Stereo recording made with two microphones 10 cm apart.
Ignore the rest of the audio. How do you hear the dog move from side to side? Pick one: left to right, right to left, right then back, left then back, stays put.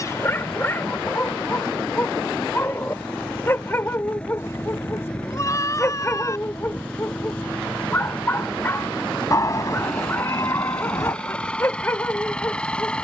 stays put.